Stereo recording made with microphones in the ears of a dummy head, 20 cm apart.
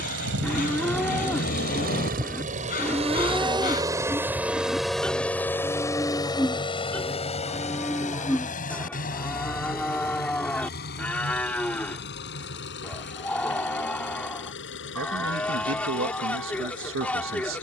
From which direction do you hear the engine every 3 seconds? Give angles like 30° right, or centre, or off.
50° right, 10° right, 30° left, 50° left, 50° left, 60° left.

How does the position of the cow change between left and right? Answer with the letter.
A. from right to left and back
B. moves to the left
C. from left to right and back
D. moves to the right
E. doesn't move
E.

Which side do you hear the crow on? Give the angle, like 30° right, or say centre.
40° left.